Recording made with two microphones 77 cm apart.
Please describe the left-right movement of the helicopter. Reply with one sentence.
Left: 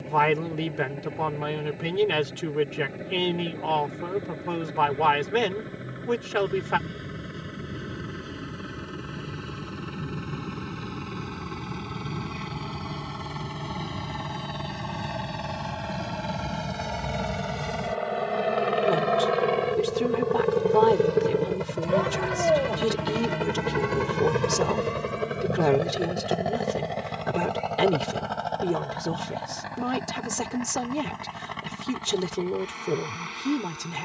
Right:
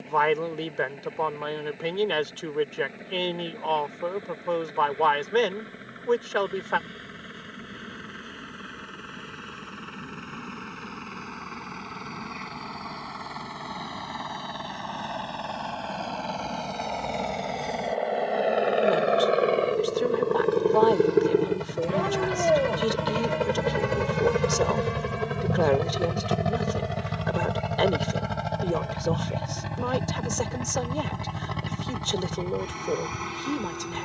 In this clip you hear the helicopter go from the left side to the right.